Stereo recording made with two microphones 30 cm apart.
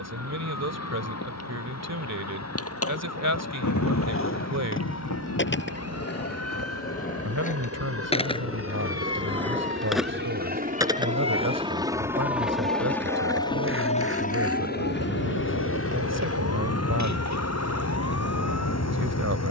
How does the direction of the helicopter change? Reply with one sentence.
In this clip you hear the helicopter travel towards the left.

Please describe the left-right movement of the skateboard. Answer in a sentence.
You can hear the skateboard go from the left side to the right.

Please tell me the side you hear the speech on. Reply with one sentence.
You can hear the speech on the right.